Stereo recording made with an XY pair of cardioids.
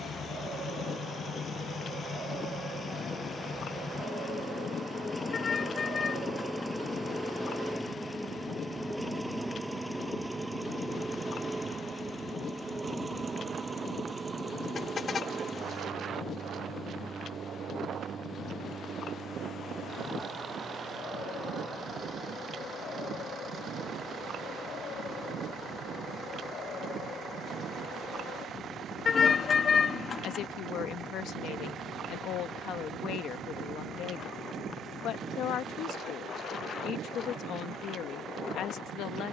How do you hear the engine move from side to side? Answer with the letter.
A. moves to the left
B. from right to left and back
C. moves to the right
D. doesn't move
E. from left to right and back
C.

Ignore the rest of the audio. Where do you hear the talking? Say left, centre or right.
left.